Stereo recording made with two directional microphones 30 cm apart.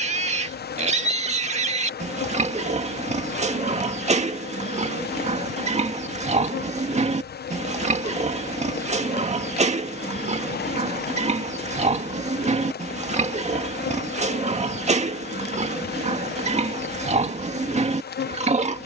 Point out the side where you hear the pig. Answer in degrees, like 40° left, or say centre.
20° right.